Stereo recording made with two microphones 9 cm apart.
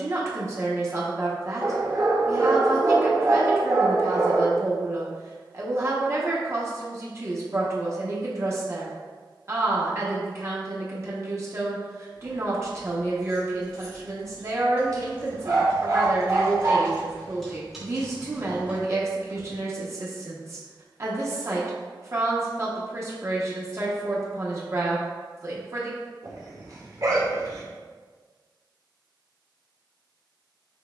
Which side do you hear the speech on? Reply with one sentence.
You can hear the speech on the right.